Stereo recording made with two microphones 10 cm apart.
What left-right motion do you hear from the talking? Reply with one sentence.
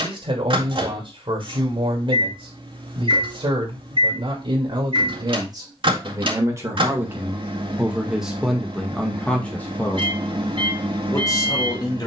In this clip you hear the talking move from right to left.